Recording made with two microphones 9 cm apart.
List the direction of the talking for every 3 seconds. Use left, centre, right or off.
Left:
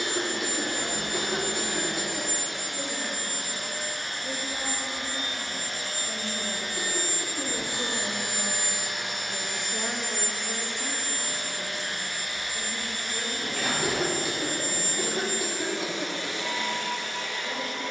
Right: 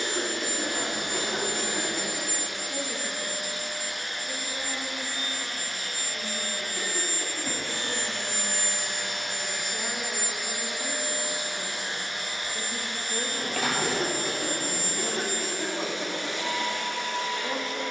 right, left, left, centre, right, right.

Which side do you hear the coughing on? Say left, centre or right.
centre.